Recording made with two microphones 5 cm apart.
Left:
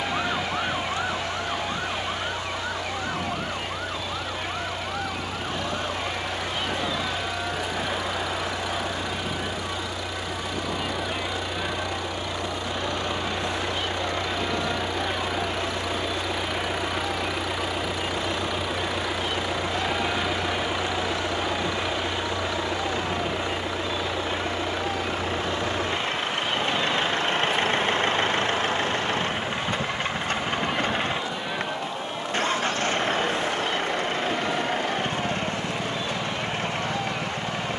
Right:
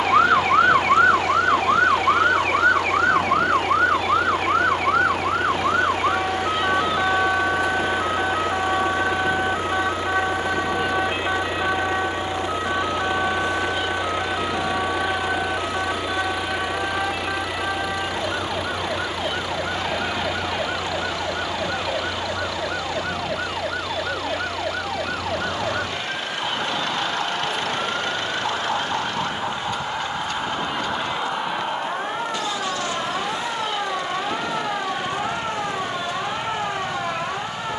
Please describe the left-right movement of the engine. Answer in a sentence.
You can hear the engine travel towards the left.